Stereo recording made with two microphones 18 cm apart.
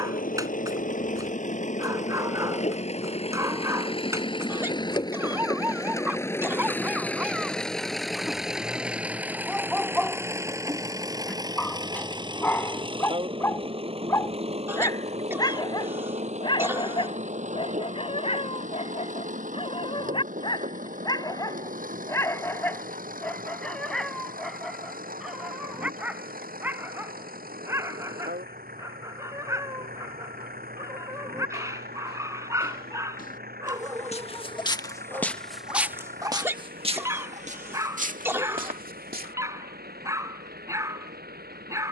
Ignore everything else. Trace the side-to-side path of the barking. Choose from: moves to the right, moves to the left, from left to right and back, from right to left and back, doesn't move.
from right to left and back.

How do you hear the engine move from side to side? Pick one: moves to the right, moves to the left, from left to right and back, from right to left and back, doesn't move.
moves to the right.